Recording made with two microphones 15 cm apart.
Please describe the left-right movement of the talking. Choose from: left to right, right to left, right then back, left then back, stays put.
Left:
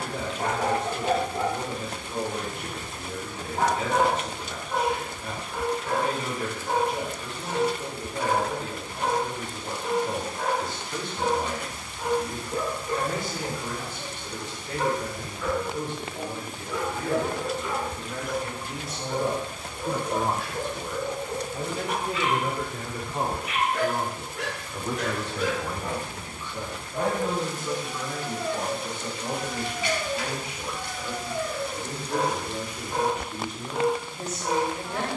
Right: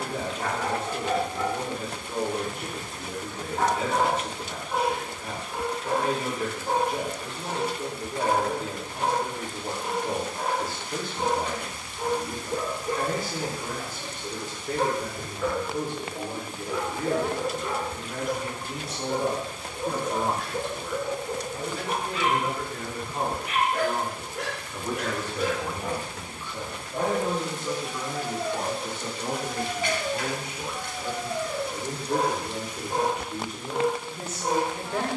left then back.